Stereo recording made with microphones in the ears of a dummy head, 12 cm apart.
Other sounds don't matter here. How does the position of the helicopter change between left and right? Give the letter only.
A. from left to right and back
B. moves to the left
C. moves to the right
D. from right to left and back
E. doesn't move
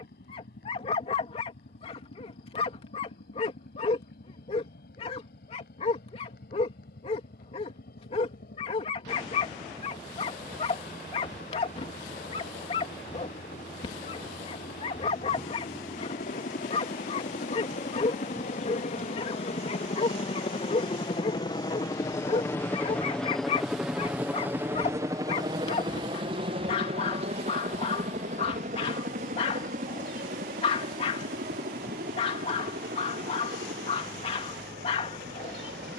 C.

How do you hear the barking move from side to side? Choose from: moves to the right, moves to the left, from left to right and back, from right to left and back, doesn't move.
doesn't move.